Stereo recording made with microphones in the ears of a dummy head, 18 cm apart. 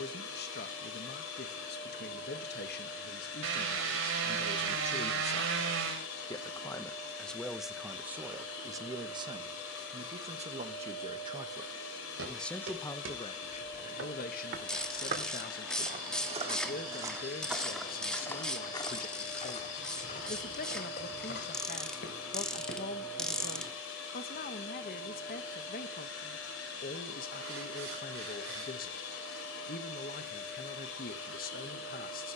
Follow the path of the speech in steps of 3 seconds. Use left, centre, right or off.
left, left, centre, right, left, left, left, left, left, left, left.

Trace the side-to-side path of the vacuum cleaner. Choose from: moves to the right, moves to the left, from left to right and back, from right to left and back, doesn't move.
doesn't move.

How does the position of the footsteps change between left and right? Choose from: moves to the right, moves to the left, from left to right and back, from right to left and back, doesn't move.
moves to the left.